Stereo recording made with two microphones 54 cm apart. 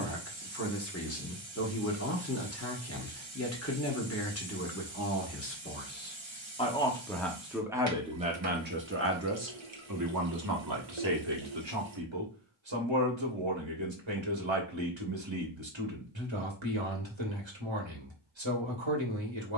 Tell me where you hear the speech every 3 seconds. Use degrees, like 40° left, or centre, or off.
30° left, 30° left, centre, 40° right, 60° right, 60° right, 60° right.